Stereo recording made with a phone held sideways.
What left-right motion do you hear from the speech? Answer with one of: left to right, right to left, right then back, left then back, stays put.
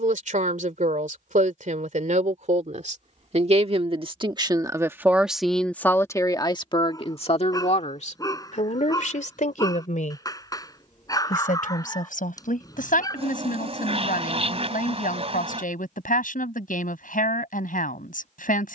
right to left.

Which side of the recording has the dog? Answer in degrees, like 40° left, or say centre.
30° left.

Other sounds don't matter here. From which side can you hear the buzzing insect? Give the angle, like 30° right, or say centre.
50° right.